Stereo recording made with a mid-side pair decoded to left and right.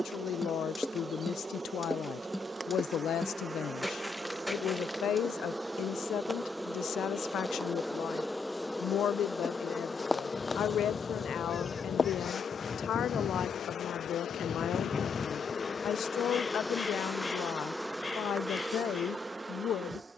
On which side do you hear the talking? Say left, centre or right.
left.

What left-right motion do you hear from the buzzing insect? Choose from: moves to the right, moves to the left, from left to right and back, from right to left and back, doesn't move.
from right to left and back.